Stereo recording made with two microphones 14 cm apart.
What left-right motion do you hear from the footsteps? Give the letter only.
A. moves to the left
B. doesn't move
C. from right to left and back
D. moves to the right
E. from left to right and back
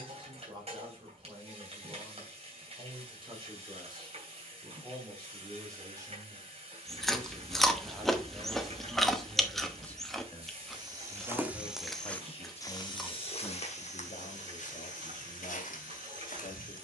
A.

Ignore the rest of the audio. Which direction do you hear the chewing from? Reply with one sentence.
In this clip you hear the chewing in the centre.